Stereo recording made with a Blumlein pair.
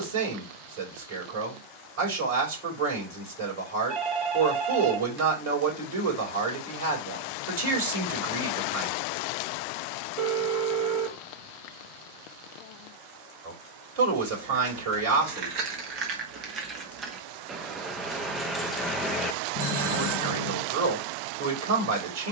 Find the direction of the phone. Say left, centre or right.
right.